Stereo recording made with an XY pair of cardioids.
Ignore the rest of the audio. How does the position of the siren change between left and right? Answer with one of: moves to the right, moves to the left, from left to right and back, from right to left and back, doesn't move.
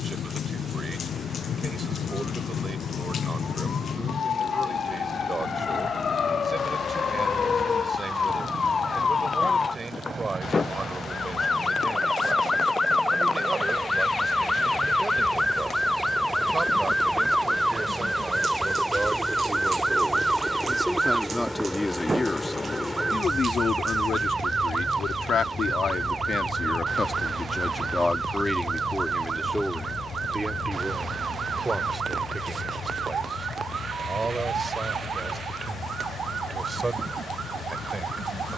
moves to the right.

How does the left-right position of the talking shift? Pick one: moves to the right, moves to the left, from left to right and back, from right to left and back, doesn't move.
from right to left and back.